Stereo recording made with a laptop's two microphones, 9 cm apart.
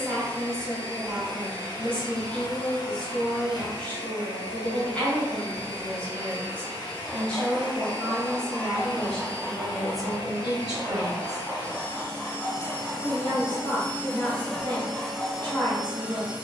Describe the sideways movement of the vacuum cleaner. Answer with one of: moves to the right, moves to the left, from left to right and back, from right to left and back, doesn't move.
moves to the right.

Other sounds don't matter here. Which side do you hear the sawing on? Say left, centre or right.
left.